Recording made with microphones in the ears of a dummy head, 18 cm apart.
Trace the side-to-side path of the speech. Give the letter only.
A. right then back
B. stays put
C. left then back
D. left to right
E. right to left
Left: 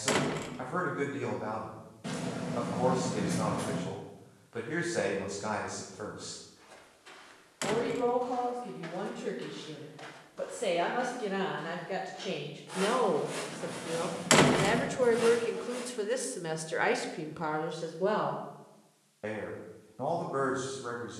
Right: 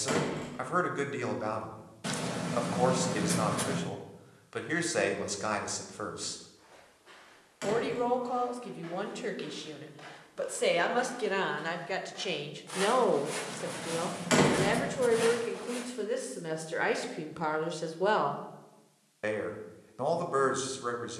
C.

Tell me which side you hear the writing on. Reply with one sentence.
In this clip you hear the writing on the right.